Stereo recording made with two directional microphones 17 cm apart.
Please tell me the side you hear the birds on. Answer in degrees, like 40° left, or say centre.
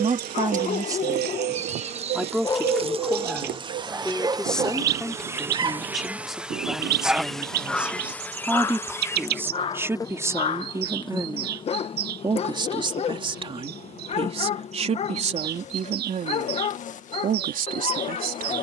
70° right.